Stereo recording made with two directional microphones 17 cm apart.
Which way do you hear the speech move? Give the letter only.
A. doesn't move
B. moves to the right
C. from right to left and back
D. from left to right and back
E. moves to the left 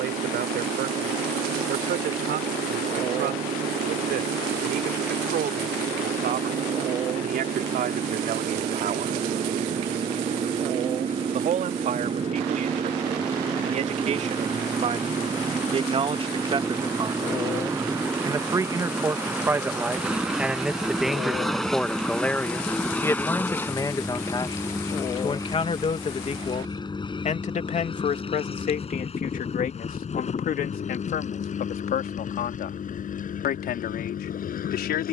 E.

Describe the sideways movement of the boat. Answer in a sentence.
You can hear the boat travel towards the left.